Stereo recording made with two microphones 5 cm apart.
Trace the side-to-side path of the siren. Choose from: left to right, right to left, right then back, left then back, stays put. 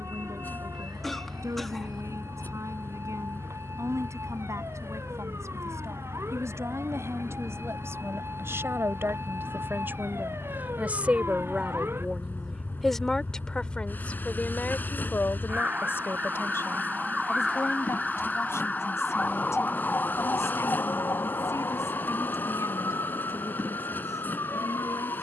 right to left.